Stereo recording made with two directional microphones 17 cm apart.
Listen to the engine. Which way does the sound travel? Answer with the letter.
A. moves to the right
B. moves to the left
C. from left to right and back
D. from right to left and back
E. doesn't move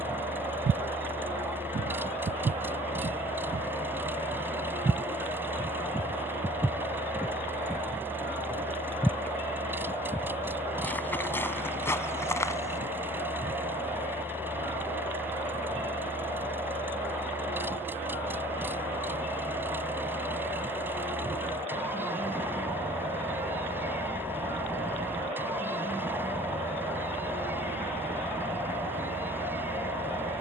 E.